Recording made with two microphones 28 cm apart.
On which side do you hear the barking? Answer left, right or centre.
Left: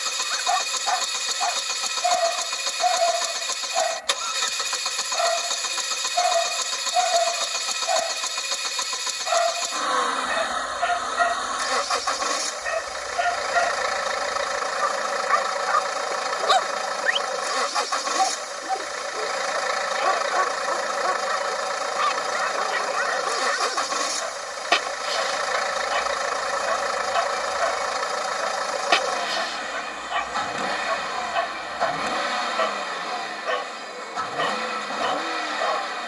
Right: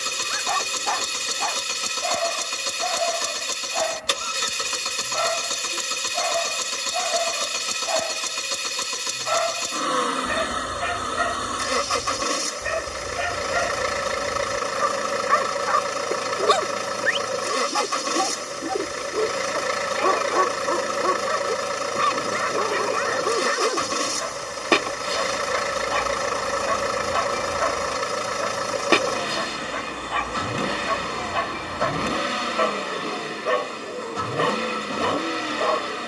right.